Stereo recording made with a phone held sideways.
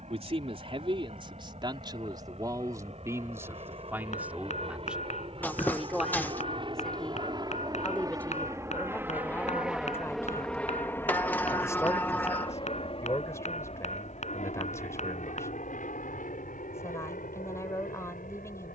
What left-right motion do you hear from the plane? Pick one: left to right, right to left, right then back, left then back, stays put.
right to left.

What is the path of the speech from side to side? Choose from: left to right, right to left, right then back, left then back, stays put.
right to left.